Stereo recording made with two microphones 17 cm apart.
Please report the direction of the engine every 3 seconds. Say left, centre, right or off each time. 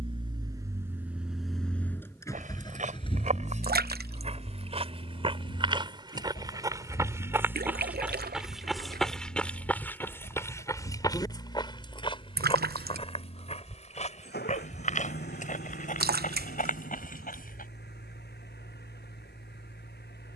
centre, left, left, left, left, left, left.